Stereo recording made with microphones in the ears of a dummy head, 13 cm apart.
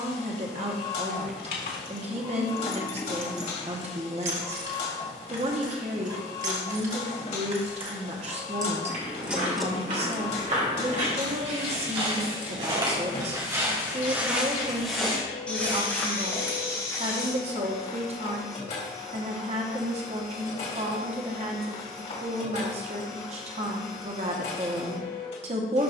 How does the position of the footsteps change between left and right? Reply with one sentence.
You can hear the footsteps move to the left.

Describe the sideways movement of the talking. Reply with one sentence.
In this clip you hear the talking stay put.